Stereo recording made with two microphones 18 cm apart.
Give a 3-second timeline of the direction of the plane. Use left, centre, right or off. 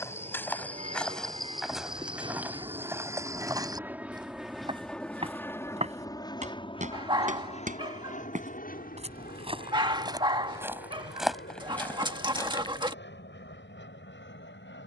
right, centre, left, left, left.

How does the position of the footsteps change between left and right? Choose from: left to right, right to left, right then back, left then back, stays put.
right then back.